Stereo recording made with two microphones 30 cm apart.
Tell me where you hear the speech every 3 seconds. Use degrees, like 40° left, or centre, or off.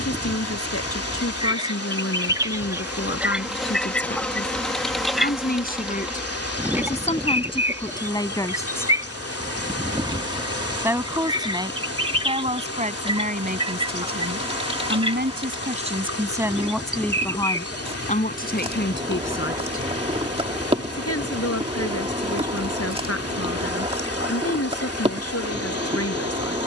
50° left, 40° left, 20° left, 10° right, 30° right, 10° right, 40° left, 50° left, 50° left.